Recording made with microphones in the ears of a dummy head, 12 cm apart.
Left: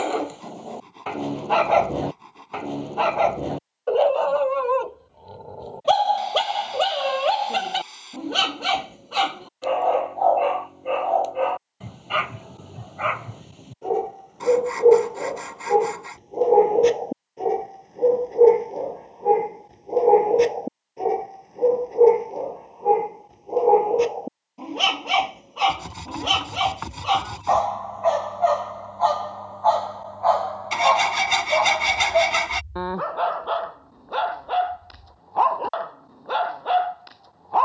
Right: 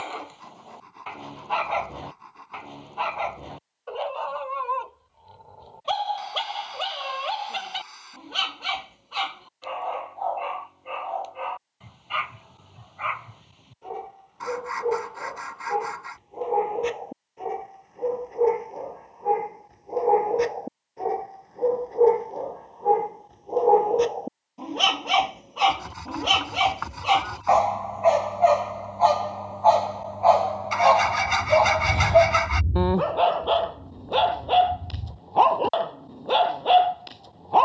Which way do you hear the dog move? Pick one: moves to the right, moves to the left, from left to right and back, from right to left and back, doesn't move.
moves to the right.